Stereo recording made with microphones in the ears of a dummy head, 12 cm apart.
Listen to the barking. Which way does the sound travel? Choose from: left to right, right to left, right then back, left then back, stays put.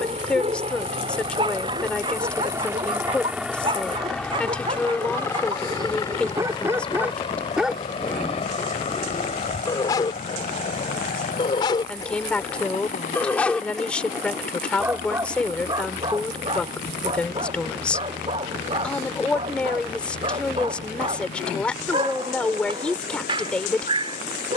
left then back.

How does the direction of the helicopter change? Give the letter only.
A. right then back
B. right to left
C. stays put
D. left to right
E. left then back
B.